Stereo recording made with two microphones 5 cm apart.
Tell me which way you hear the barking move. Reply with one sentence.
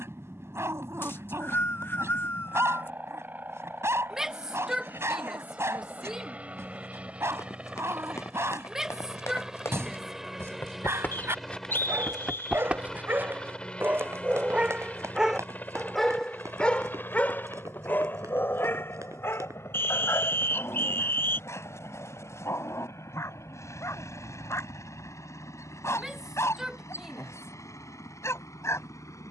You can hear the barking travel towards the left.